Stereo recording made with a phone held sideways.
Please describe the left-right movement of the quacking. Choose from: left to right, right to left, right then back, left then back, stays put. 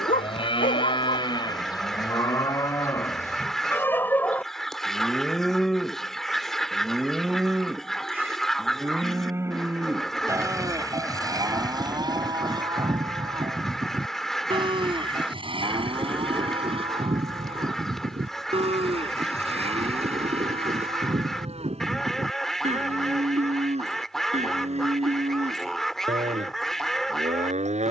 stays put.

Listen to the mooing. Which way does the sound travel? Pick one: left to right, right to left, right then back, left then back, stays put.
left to right.